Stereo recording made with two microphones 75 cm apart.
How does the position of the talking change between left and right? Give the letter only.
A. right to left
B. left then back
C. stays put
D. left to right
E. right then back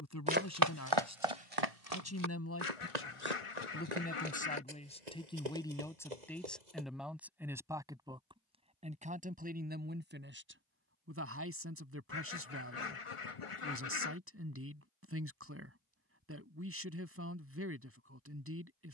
D.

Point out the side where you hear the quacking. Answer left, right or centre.
left.